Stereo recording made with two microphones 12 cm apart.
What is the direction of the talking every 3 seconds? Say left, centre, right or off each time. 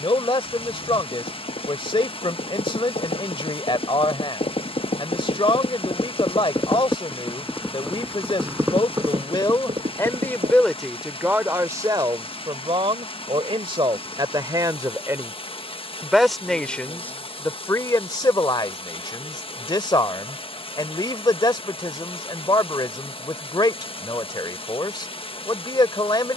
left, left, left, centre, right, centre, left, left, left.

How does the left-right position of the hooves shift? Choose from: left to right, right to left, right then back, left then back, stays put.
left to right.